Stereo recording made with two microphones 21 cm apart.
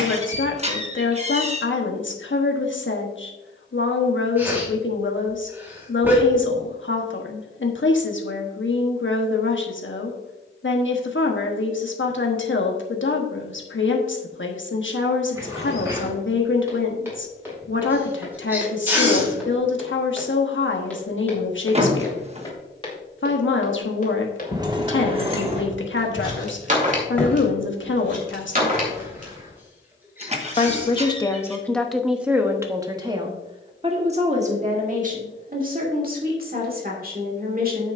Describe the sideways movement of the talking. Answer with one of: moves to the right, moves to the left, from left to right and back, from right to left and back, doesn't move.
moves to the right.